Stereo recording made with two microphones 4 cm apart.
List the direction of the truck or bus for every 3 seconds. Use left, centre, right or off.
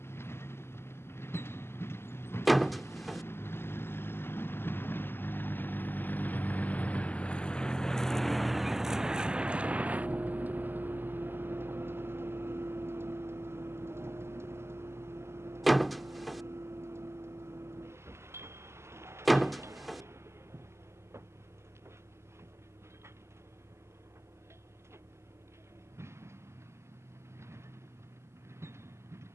left, left, left, right, right, right, right, right, right, right.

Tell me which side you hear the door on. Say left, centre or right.
centre.